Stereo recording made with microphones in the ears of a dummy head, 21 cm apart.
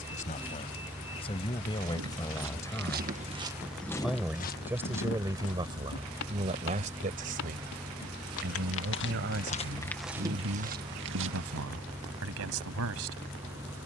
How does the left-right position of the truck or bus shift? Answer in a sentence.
You can hear the truck or bus stay put.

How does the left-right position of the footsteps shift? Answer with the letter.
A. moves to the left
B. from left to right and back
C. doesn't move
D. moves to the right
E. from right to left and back
E.